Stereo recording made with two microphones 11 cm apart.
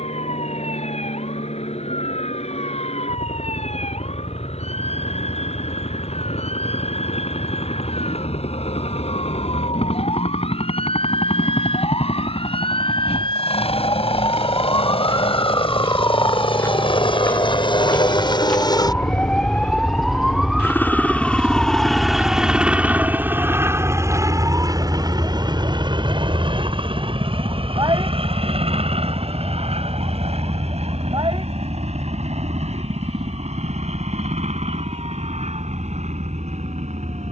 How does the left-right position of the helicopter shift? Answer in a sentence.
You can hear the helicopter go from the left side to the right.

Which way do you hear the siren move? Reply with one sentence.
You can hear the siren move to the right.